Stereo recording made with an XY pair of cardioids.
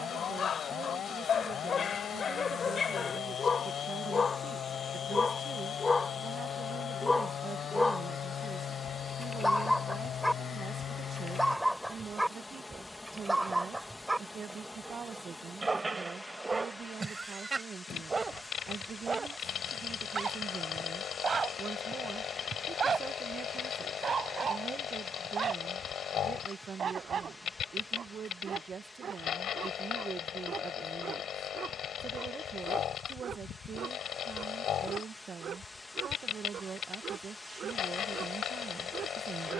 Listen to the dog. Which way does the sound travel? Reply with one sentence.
In this clip you hear the dog move to the right.